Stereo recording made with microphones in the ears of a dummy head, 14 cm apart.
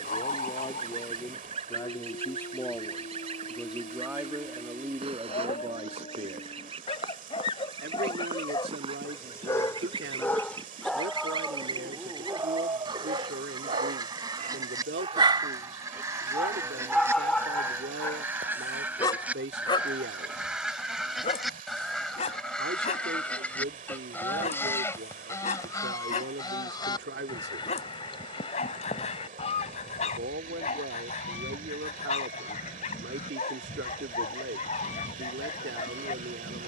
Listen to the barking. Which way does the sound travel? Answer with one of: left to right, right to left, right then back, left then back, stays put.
right then back.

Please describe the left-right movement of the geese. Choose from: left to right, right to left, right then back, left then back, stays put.
right to left.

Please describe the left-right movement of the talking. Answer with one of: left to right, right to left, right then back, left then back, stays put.
left to right.